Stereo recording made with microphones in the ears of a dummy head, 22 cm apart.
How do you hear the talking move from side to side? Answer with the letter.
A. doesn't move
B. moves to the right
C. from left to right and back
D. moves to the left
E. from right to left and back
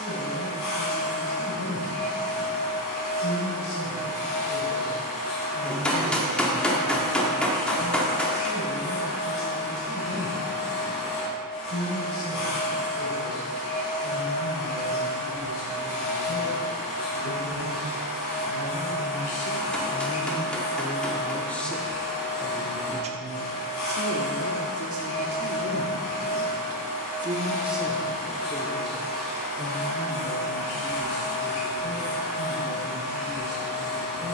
C.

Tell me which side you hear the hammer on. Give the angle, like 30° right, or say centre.
centre.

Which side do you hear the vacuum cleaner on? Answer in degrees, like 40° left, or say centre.
60° left.